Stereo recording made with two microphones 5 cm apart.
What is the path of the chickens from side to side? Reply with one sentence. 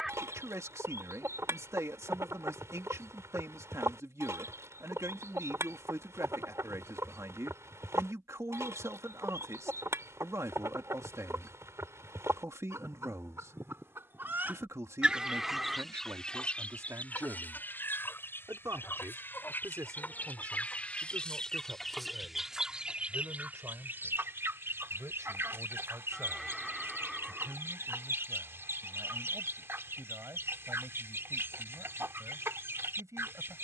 In this clip you hear the chickens go left and come back.